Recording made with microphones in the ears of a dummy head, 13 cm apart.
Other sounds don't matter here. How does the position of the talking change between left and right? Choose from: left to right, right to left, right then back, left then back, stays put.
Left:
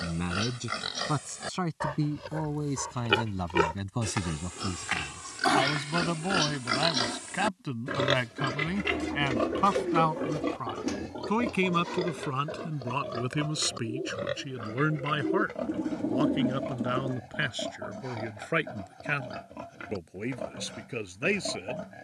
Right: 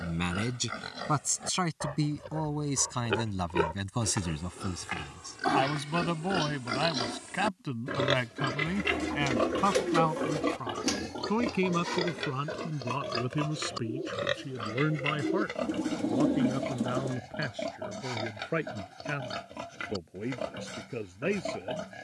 right to left.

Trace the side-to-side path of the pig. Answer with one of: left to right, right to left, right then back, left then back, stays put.
left to right.